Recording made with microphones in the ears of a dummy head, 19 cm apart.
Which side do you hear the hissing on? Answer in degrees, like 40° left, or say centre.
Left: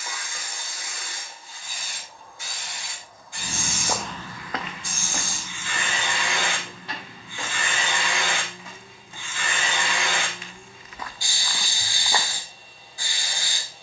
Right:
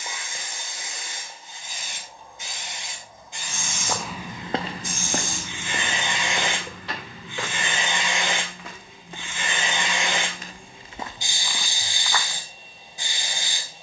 20° right.